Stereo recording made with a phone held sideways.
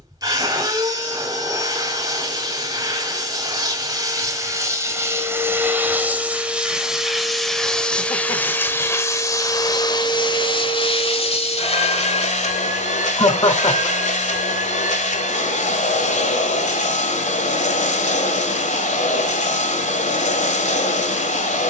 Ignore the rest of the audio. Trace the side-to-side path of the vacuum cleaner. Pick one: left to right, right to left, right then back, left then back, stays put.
right to left.